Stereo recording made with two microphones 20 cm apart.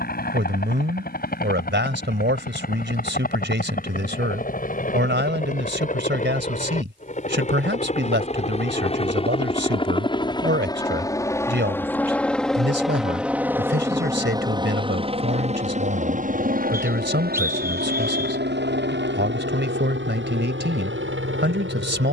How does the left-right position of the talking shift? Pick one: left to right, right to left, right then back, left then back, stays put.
stays put.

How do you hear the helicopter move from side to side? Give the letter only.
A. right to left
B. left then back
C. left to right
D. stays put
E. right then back
C.